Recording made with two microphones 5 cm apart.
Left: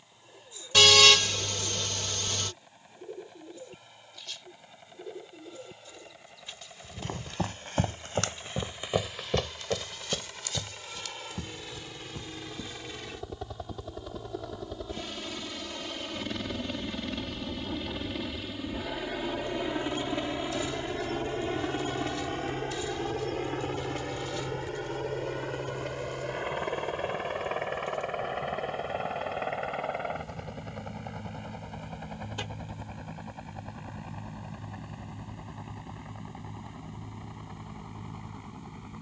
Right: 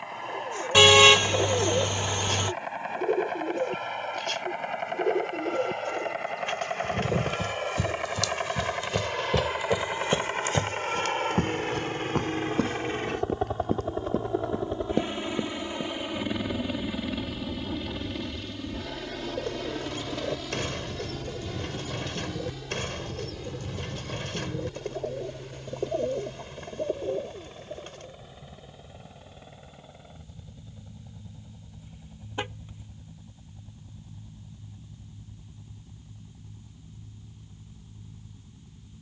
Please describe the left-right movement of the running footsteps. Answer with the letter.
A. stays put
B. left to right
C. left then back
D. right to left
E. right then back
B.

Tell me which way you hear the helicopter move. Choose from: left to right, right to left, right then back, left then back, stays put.
right to left.